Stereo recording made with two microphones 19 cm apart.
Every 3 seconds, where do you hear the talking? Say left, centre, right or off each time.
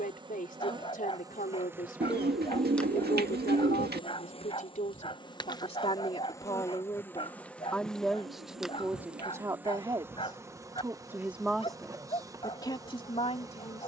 left, left, centre, centre, left.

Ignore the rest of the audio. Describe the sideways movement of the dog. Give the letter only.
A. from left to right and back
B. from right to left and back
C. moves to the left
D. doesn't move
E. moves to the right
D.